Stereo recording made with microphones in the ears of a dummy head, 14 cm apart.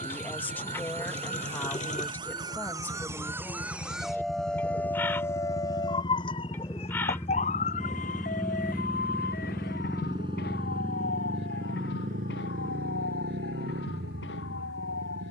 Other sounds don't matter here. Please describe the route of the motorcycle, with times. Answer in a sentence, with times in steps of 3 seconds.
You can hear the motorcycle on the left from 0 s, in the centre from 6 s and on the right from 9 s.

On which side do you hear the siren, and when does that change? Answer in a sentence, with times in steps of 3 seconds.
In this clip you hear the siren on the right from 0 s, in the centre from 3 s and on the left from 6 s.